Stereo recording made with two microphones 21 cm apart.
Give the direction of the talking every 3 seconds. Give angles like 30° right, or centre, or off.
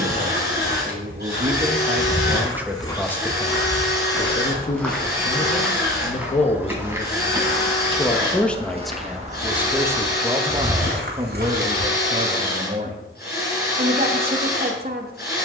30° right, 30° left, 20° left, 20° right, 40° right.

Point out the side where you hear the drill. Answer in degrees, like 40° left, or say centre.
50° left.